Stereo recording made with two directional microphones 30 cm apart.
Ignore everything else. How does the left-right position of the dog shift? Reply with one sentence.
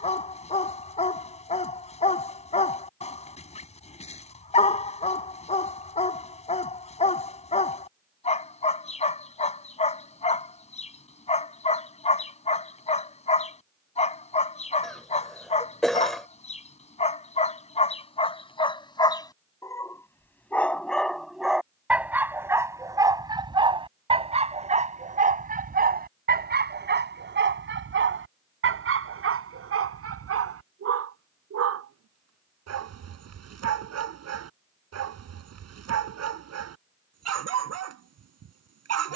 In this clip you hear the dog travel towards the right.